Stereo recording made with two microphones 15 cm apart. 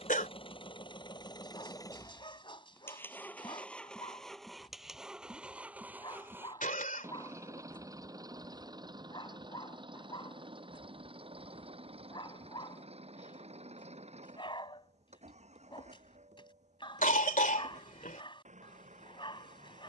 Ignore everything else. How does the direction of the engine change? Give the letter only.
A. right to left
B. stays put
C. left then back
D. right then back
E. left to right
E.